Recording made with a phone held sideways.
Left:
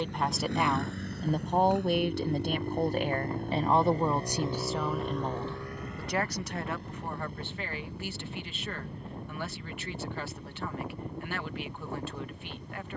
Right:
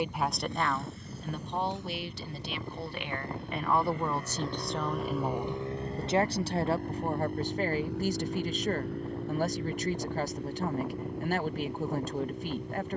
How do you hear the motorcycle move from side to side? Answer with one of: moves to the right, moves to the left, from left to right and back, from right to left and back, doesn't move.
moves to the right.